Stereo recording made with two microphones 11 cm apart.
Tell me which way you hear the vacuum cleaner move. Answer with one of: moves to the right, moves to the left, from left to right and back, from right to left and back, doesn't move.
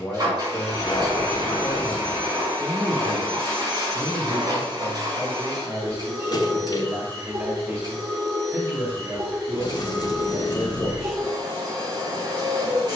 doesn't move.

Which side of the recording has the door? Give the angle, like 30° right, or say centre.
40° left.